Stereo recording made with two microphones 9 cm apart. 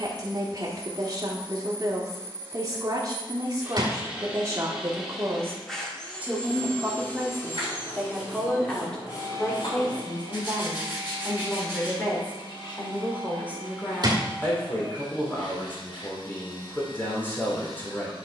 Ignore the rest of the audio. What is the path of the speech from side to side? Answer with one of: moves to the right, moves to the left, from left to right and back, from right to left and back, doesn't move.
moves to the left.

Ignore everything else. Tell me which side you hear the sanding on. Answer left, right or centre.
left.